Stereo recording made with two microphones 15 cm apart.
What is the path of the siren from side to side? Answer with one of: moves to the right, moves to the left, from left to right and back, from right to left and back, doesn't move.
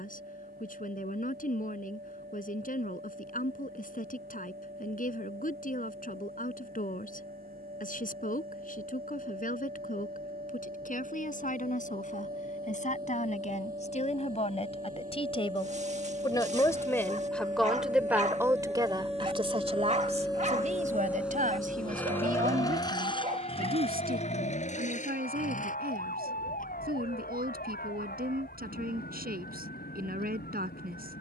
moves to the left.